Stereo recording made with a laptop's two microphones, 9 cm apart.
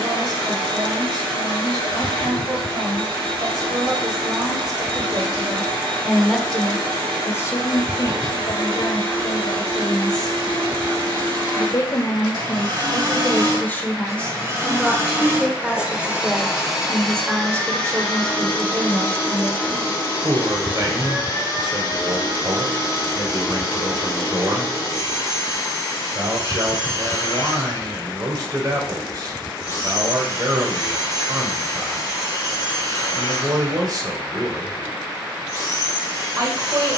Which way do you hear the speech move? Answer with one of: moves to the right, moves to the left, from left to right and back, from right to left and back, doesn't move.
from right to left and back.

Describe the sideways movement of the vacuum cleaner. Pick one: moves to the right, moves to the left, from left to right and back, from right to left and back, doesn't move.
moves to the left.